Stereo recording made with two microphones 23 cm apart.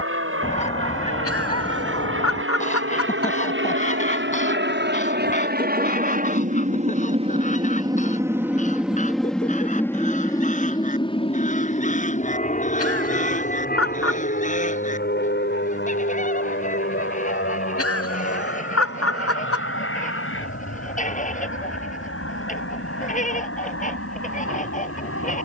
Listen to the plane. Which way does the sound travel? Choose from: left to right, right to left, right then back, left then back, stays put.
right to left.